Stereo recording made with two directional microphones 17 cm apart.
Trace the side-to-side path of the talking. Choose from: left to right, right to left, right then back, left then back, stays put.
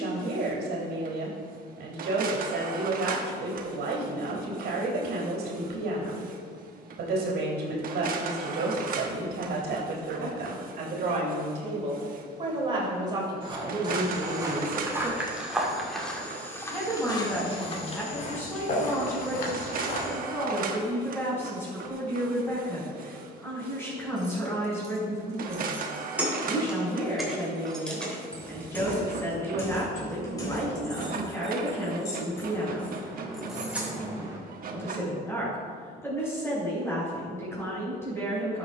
right to left.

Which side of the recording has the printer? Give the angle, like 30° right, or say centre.
50° right.